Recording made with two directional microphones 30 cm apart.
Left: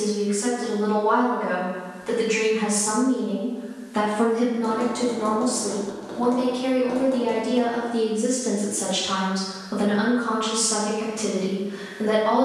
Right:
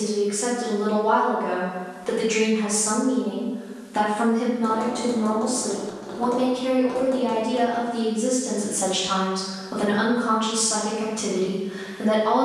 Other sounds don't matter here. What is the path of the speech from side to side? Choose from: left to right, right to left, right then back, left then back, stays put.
left then back.